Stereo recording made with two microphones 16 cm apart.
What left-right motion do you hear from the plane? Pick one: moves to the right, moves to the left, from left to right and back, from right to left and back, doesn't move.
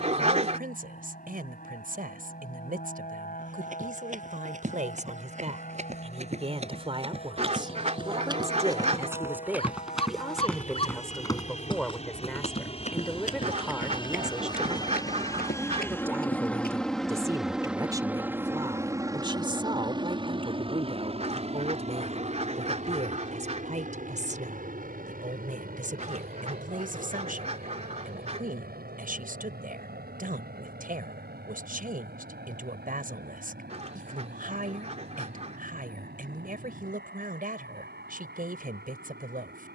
moves to the right.